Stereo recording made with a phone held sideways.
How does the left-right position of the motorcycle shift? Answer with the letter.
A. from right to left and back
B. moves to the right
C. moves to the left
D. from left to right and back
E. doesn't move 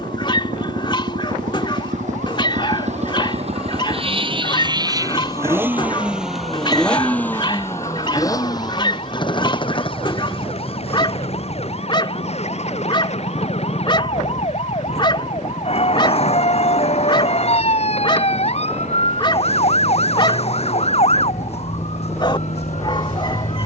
C.